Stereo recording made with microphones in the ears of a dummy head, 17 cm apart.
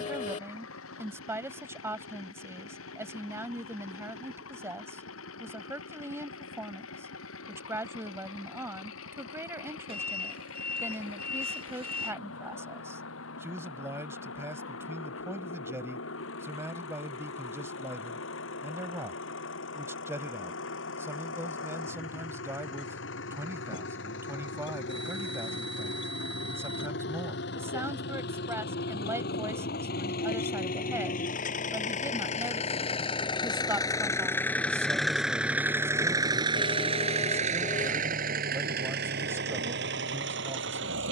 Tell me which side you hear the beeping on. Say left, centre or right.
right.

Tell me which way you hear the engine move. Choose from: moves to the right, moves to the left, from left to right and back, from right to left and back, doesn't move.
moves to the right.